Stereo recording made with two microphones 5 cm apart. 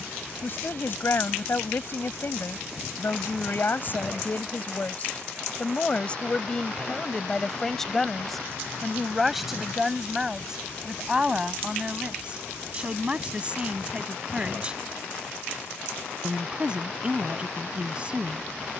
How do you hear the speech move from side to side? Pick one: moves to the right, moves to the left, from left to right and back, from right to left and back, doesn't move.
moves to the right.